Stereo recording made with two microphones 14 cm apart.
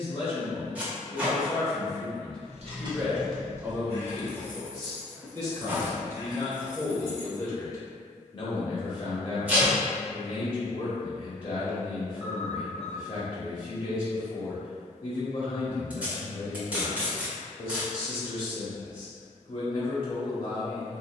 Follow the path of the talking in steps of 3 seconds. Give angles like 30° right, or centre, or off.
30° left, 20° right, 20° left, 40° left, 40° left, 40° left, 40° left.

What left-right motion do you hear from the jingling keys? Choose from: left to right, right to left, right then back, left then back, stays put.
left then back.